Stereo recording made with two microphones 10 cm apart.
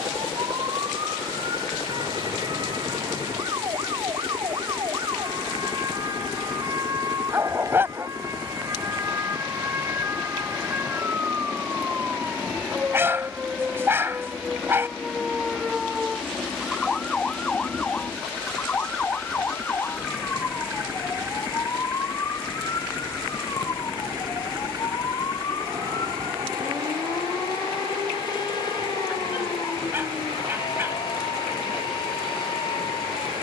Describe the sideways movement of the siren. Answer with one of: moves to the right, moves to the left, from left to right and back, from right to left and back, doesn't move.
moves to the left.